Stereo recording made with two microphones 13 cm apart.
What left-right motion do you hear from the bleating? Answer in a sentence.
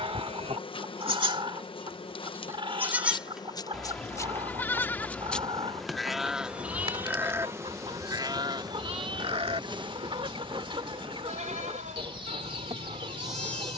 You can hear the bleating move from right to left and back again.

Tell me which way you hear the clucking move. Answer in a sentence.
You can hear the clucking stay in one place.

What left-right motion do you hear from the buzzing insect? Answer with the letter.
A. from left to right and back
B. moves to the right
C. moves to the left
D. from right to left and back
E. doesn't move
B.